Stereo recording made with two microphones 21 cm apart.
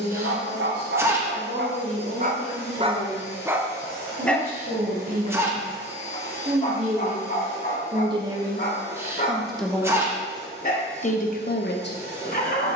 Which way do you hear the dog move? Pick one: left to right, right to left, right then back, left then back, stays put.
right to left.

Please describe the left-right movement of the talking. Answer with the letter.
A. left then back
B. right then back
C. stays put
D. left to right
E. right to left
E.